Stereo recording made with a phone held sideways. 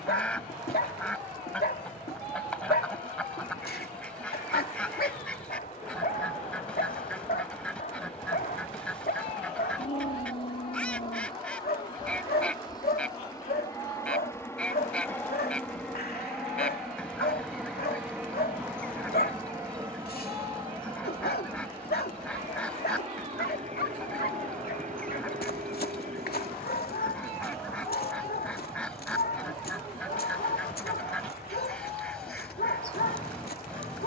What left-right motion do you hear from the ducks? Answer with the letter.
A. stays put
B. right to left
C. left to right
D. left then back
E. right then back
A.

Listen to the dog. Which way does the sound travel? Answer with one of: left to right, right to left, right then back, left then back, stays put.
stays put.